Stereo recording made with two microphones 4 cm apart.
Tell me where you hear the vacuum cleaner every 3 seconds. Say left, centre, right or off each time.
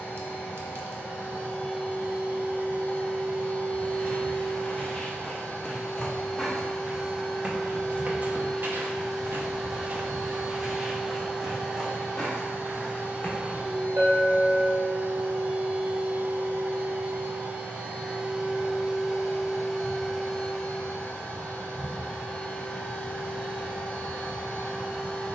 left, left, centre, centre, right, right, centre, left, left.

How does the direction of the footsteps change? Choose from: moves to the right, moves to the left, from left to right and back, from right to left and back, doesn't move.
from left to right and back.